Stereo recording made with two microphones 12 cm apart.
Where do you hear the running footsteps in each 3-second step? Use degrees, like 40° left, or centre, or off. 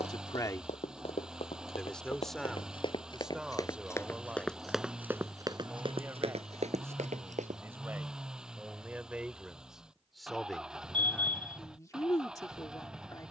50° left, centre, 60° right, off, off.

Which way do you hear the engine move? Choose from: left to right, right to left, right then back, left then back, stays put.
stays put.